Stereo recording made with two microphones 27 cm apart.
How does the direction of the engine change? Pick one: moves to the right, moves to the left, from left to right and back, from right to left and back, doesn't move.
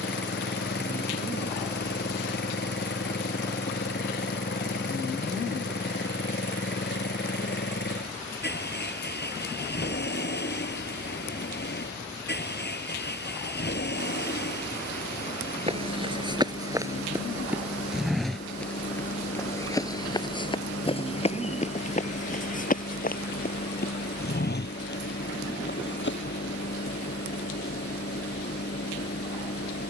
doesn't move.